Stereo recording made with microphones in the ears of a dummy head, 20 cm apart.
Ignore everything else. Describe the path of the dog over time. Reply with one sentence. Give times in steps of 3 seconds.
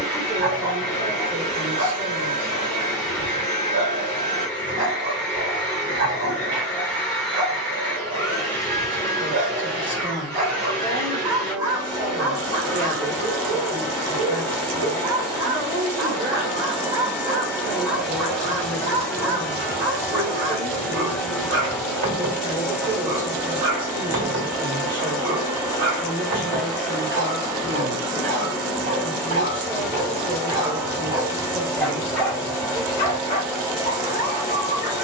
You can hear the dog on the right from 0 s, in the centre from 30 s and on the left from 33 s.